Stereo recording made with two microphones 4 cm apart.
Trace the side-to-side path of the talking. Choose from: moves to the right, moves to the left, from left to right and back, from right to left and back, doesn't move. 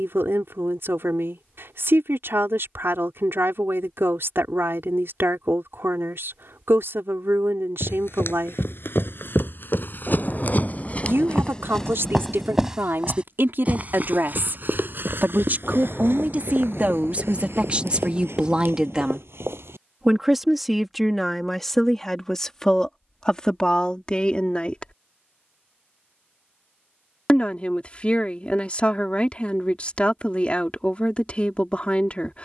moves to the left.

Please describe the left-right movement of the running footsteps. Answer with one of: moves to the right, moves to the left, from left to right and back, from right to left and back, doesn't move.
moves to the right.